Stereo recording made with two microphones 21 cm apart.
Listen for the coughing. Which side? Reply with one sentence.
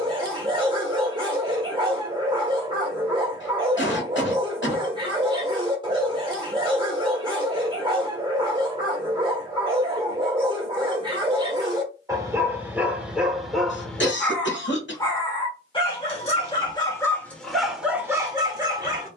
You can hear the coughing on the left.